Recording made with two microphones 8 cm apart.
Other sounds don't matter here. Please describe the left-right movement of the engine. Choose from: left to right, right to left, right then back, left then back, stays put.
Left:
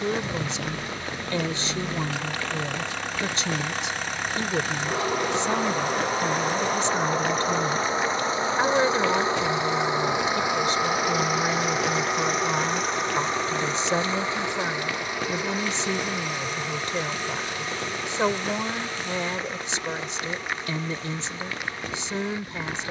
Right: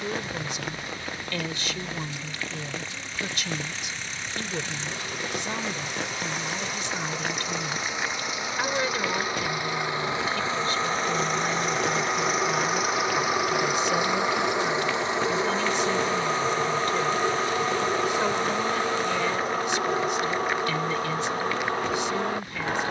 left to right.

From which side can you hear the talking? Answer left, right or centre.
left.